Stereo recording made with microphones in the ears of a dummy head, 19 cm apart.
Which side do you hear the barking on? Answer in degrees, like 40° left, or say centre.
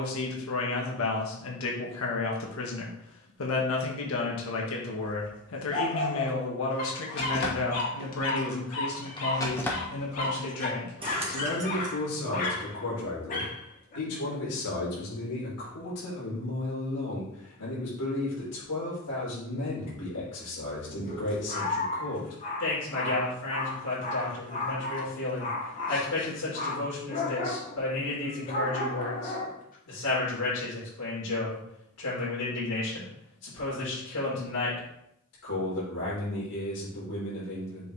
40° left.